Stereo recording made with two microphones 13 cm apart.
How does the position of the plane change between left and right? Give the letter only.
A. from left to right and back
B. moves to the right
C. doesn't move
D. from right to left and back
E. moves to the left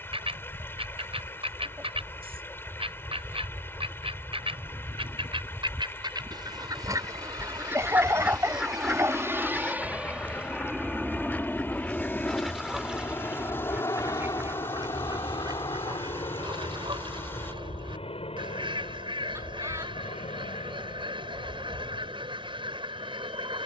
E.